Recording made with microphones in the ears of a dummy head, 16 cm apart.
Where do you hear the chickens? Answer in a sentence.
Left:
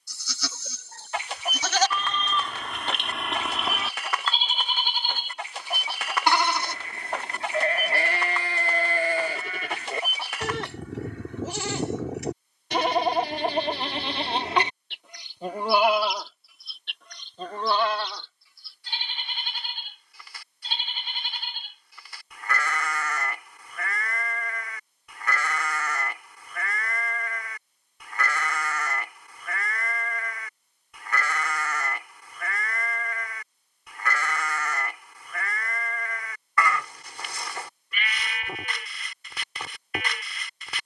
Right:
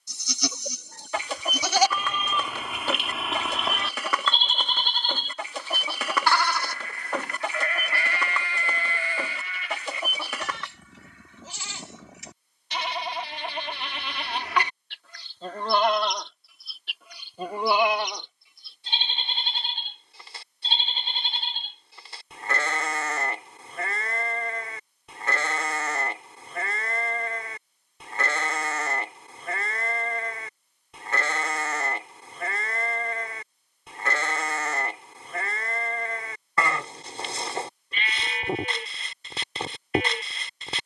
You can hear the chickens on the right.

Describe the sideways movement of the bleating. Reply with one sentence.
You can hear the bleating move from right to left and back again.